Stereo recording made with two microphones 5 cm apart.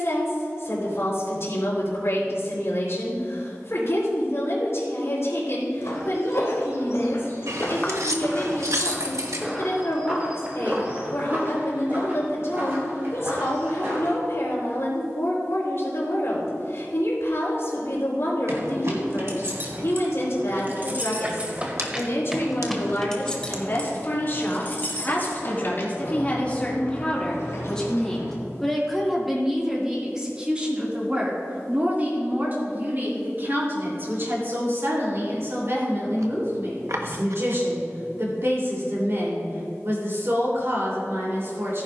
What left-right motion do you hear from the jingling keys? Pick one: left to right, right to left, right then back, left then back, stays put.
right to left.